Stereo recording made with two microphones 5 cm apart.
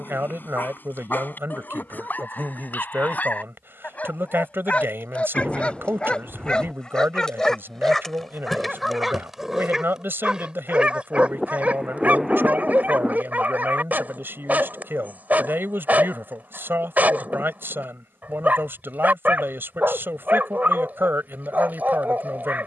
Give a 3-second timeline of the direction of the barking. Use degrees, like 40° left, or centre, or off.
50° left, 30° left, 10° left, 10° right, 30° right, 30° right, 30° right, 30° right.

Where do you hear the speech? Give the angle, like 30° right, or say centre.
50° right.